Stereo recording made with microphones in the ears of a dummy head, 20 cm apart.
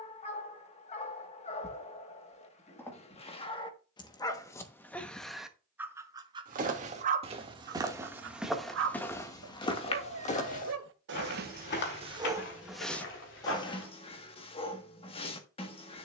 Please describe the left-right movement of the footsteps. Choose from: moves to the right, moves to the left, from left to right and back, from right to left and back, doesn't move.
moves to the left.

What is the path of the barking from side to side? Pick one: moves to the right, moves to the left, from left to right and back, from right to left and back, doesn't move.
from left to right and back.